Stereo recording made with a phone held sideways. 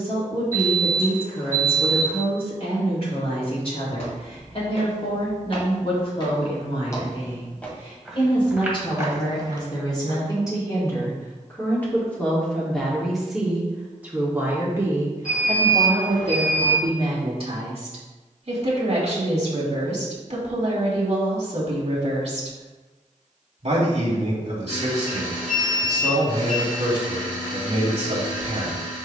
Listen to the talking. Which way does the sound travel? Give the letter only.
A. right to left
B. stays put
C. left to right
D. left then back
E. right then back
C.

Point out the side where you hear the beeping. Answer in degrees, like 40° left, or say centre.
70° left.